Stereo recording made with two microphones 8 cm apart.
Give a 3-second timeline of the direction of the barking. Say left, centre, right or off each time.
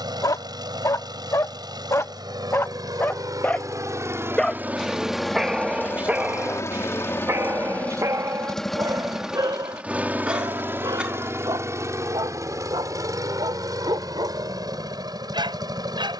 left, centre, right, right, right, right.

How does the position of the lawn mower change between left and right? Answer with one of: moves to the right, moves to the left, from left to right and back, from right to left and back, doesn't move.
from right to left and back.